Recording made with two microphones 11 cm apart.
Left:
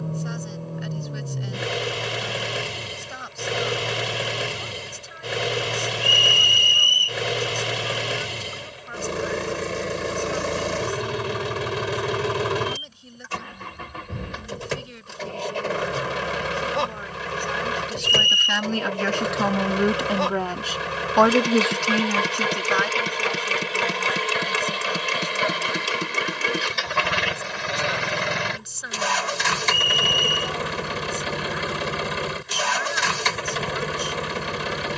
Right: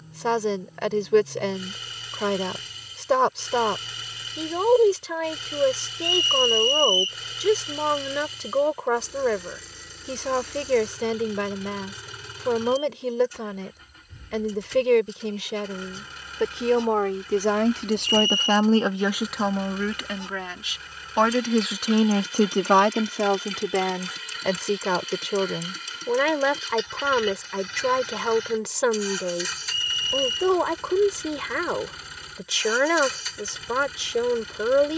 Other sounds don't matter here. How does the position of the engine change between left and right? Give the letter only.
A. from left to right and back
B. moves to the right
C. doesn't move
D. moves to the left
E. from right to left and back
C.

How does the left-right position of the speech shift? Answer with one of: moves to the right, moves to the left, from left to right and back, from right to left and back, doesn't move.
from right to left and back.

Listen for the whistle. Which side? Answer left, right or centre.
left.